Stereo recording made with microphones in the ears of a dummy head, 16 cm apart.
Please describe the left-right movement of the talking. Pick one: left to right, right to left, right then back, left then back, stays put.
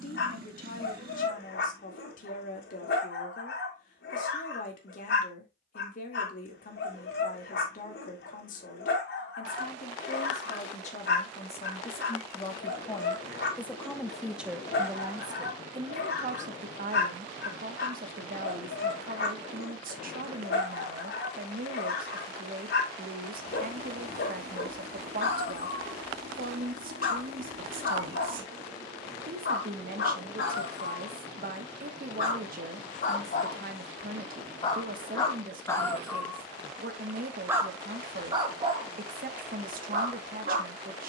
left to right.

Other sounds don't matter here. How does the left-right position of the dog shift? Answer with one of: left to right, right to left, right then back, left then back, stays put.
left to right.